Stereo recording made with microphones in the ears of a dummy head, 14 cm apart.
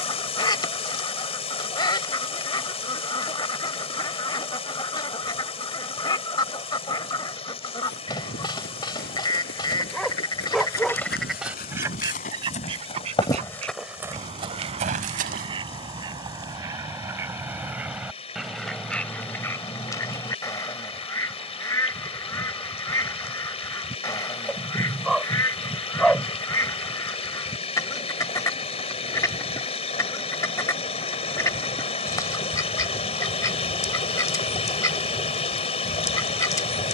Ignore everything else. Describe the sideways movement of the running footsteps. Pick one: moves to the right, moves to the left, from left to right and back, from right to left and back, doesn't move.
moves to the right.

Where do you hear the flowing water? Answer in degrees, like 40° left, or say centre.
40° left.